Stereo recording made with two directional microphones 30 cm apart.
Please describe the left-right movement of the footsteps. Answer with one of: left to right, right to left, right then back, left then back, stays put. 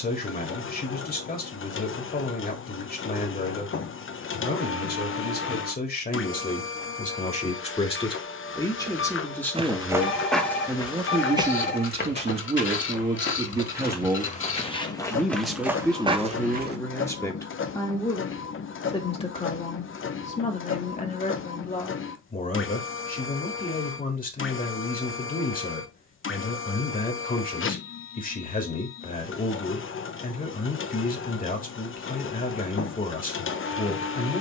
left then back.